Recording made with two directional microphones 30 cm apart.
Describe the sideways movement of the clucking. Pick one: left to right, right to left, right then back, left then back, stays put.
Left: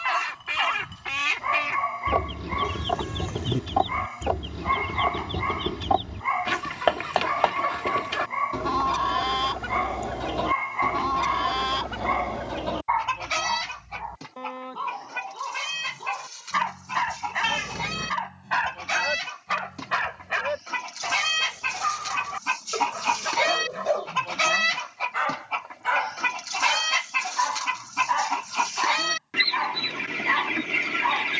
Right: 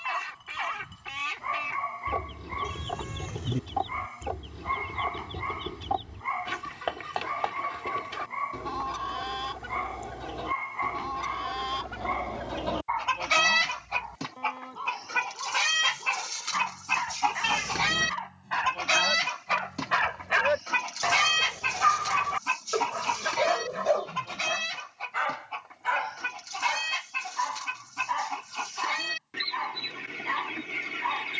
right then back.